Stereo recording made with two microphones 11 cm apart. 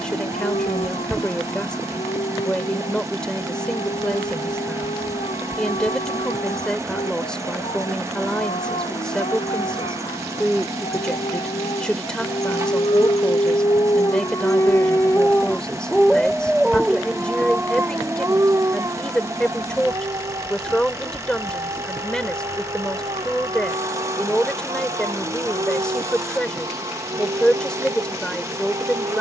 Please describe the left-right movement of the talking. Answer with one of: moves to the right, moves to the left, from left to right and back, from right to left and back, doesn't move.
doesn't move.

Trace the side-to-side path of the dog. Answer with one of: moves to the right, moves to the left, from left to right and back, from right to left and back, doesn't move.
moves to the right.